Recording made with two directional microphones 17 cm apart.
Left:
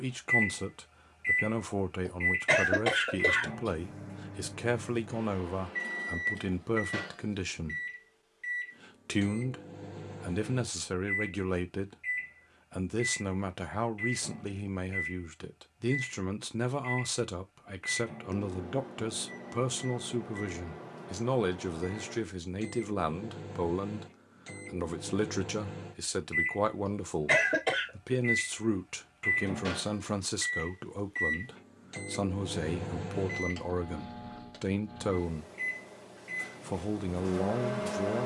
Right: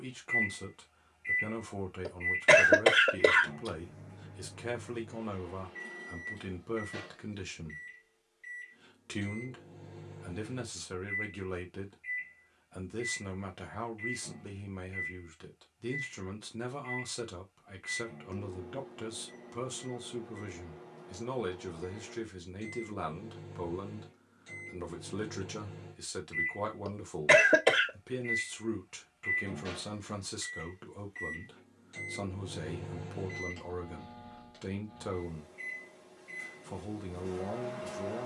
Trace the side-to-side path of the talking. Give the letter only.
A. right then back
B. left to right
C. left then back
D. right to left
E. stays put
E.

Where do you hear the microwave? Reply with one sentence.
In this clip you hear the microwave on the left.